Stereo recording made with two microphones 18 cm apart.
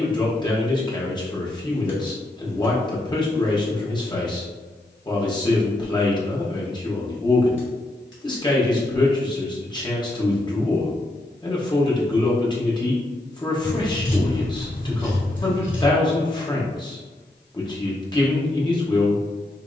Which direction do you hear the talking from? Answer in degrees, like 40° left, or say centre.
20° left.